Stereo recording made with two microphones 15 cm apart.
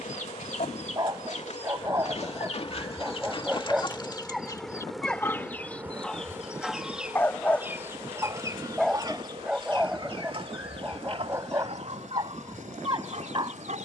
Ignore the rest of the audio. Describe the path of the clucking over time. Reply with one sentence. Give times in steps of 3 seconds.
In this clip you hear the clucking on the left from 0 s, in the centre from 6 s and on the right from 9 s.